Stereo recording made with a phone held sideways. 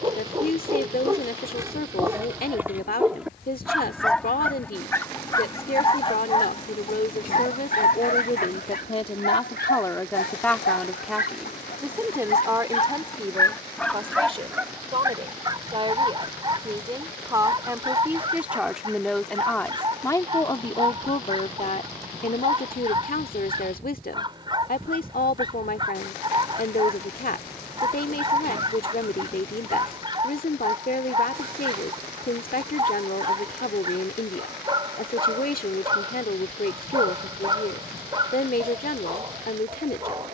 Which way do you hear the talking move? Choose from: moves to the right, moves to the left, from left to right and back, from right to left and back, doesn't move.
from left to right and back.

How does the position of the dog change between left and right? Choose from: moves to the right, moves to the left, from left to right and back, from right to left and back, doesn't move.
from right to left and back.